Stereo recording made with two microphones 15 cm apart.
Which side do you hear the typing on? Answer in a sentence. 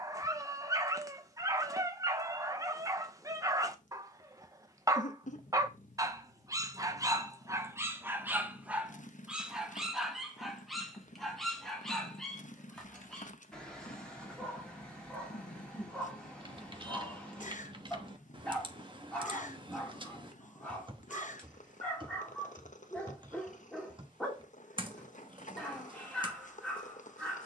You can hear the typing on the right.